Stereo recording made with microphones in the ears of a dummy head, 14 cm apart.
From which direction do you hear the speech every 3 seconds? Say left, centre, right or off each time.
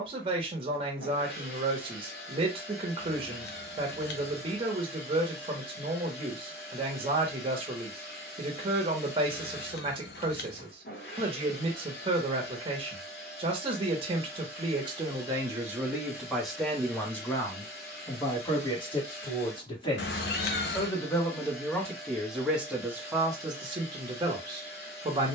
right, right, right, right, right, centre, left, centre, right.